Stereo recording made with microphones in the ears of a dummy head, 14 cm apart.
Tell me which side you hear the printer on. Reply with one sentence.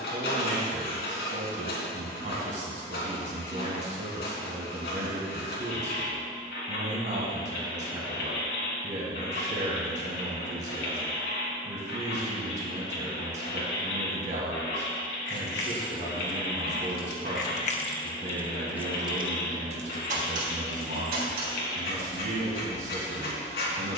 In this clip you hear the printer on the left.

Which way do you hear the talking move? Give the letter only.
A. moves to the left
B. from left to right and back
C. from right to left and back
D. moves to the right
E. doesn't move
E.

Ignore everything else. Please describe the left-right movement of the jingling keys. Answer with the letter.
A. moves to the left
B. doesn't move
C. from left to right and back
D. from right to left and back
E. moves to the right
E.